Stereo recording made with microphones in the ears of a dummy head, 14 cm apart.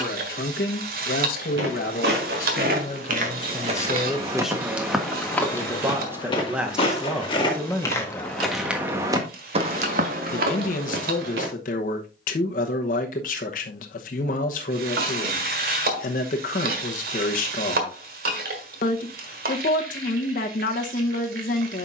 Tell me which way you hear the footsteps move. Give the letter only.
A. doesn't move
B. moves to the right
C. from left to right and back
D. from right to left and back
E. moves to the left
D.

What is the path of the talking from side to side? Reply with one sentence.
You can hear the talking go right and come back.